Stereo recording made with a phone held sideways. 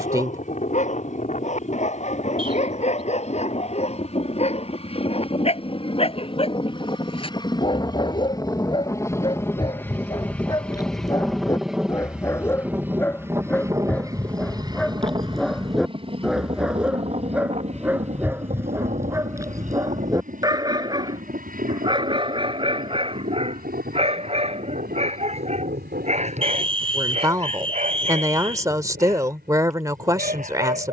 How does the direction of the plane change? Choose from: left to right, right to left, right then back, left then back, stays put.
left to right.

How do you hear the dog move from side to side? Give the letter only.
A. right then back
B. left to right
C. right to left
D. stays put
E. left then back
B.